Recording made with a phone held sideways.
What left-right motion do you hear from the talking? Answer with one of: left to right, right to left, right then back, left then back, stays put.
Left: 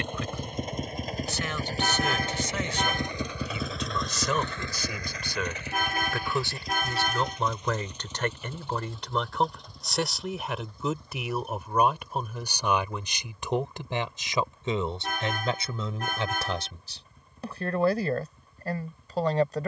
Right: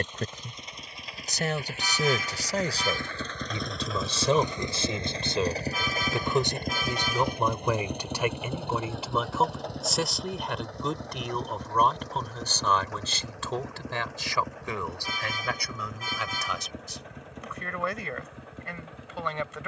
right to left.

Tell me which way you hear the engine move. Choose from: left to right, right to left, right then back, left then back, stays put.
left to right.